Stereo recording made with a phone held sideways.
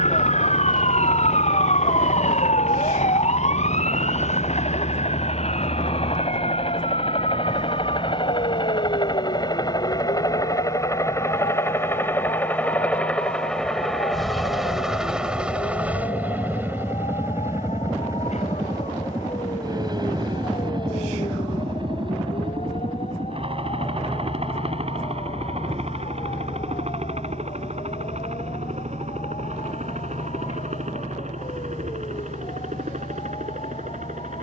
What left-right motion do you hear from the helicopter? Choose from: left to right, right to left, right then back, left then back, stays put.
left to right.